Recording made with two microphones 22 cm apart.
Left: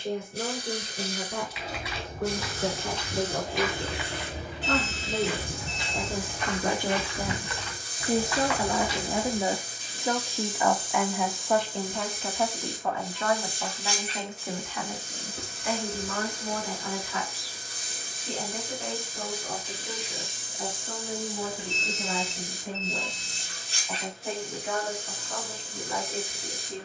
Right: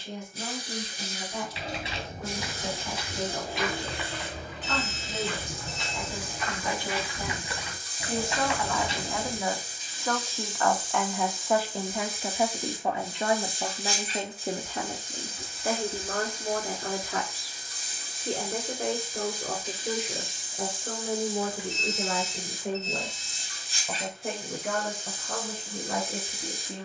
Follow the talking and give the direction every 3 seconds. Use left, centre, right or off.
left, left, left, centre, right, right, right, right, right.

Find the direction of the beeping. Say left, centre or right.
left.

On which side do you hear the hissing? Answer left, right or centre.
left.